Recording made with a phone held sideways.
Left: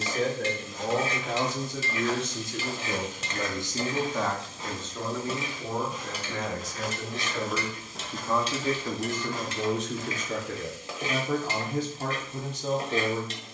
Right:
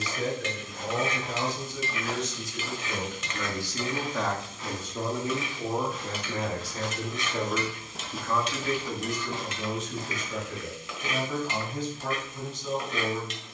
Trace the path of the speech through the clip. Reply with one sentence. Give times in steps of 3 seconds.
You can hear the speech on the left from 0 s, in the centre from 3 s and on the left from 9 s.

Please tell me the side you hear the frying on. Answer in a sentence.
You can hear the frying on the left.